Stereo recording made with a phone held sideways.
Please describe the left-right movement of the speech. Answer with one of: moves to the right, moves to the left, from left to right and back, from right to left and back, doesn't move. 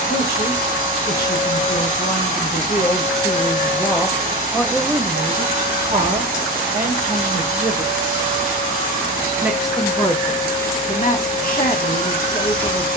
from left to right and back.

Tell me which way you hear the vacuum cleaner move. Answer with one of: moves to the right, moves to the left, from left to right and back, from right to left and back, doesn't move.
doesn't move.